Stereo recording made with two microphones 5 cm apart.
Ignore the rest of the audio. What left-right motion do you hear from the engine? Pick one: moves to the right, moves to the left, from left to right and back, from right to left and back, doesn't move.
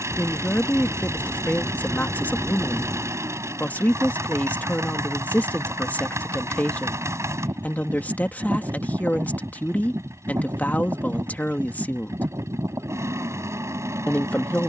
doesn't move.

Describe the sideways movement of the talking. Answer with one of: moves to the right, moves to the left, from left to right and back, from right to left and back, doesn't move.
doesn't move.